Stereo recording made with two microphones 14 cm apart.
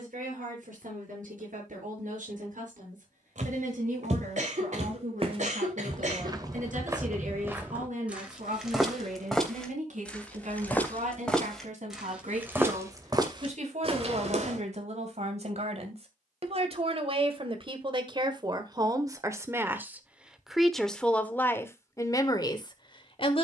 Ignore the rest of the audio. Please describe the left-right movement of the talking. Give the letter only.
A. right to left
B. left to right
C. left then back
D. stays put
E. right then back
A.